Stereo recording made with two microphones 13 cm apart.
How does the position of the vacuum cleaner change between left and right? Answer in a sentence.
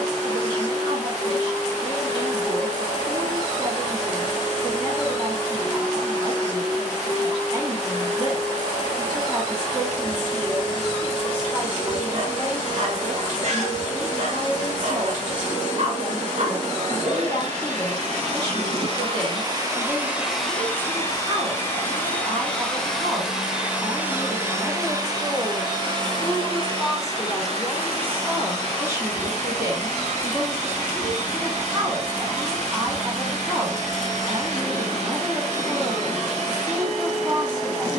In this clip you hear the vacuum cleaner go left and come back.